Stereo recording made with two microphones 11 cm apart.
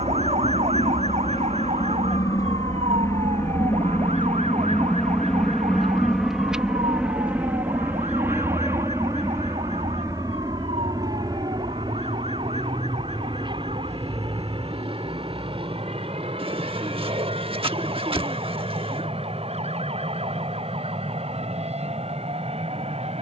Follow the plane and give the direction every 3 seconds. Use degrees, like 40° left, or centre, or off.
40° left, 10° left, 10° right, 30° right, 40° right, 50° right, 60° right, 60° right.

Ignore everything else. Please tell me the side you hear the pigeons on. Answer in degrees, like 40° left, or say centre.
60° right.